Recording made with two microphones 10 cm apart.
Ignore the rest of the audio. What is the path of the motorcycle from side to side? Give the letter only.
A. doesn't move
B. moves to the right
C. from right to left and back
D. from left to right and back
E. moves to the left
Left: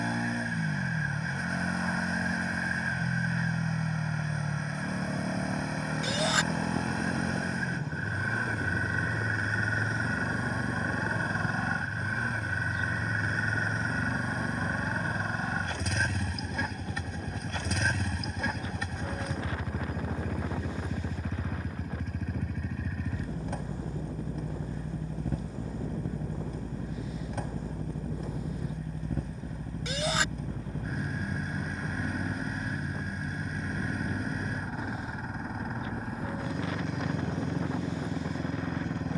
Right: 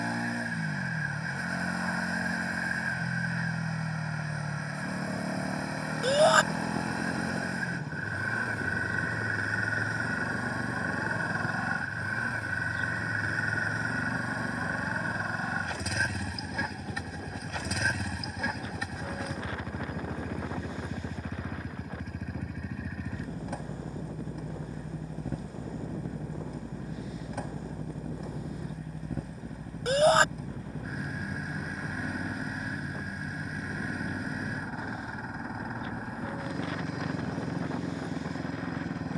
A.